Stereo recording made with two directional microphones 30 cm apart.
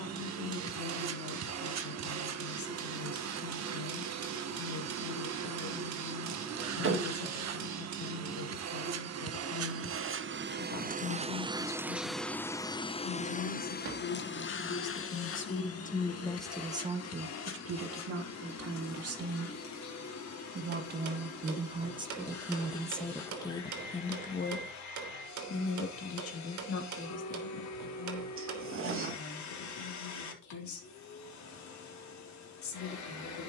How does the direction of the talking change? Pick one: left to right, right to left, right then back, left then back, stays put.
right then back.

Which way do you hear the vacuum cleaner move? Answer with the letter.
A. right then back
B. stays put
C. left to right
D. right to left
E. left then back
D.